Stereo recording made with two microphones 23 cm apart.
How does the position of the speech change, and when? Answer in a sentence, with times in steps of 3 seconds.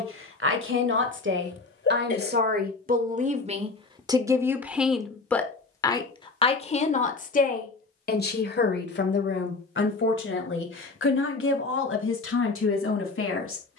In this clip you hear the speech on the right from 0 s, in the centre from 3 s and on the left from 6 s.